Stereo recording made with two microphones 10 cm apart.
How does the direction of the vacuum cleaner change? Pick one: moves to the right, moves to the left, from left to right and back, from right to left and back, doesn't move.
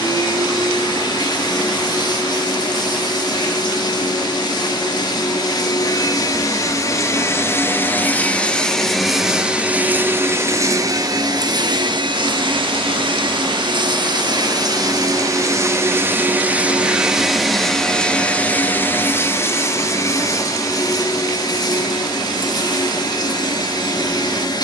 from left to right and back.